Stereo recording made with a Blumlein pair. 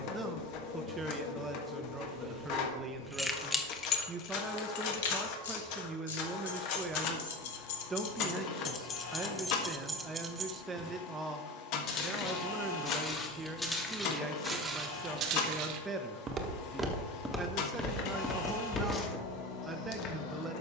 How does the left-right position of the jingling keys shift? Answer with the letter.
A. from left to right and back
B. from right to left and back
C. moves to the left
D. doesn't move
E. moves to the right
B.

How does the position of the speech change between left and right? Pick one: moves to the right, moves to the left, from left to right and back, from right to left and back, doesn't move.
doesn't move.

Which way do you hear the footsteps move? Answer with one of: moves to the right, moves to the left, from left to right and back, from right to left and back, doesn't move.
from left to right and back.